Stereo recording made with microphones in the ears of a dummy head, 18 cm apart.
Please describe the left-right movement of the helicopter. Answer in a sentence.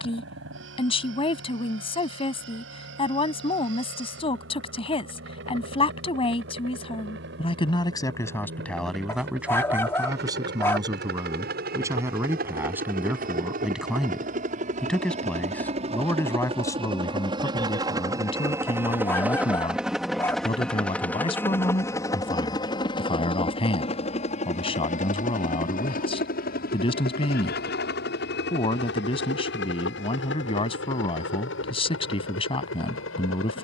In this clip you hear the helicopter move to the left.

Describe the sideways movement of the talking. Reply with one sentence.
You can hear the talking go right and come back.